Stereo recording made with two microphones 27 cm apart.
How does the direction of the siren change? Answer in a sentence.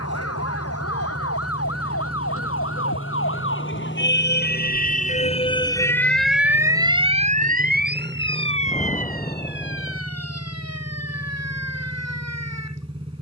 You can hear the siren move to the right.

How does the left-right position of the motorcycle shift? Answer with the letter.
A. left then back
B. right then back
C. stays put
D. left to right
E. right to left
C.